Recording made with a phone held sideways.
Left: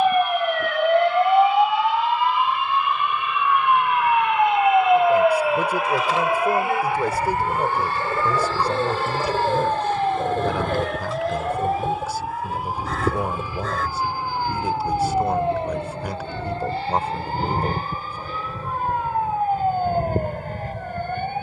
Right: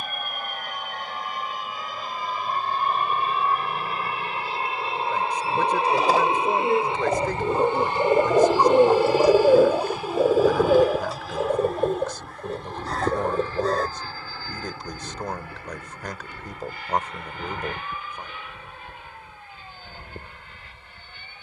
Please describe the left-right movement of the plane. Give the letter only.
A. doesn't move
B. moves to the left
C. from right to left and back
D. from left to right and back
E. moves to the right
B.